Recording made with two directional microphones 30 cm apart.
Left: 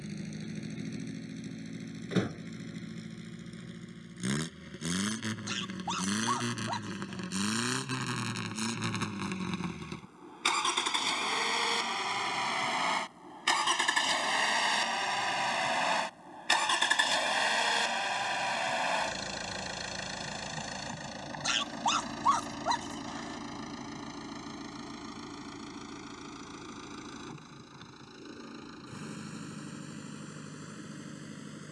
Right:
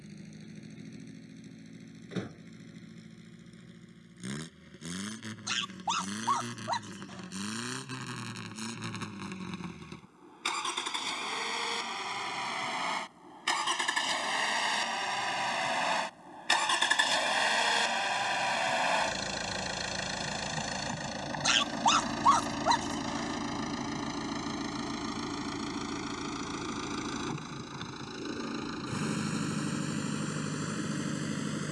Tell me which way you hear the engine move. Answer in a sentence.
In this clip you hear the engine move to the right.